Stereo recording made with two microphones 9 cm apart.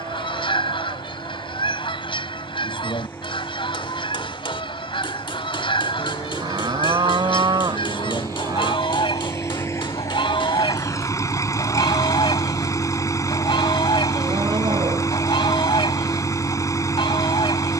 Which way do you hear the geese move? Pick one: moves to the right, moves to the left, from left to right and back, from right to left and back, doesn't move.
doesn't move.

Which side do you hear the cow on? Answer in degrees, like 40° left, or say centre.
60° right.